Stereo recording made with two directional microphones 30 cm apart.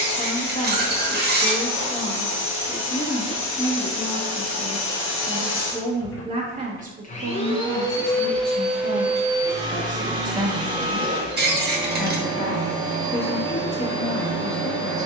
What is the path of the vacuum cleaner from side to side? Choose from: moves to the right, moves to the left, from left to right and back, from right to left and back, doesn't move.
moves to the right.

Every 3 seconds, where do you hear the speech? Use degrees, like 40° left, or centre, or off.
20° left, 10° left, 30° right, 20° right, 20° left.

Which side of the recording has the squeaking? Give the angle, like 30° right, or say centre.
30° right.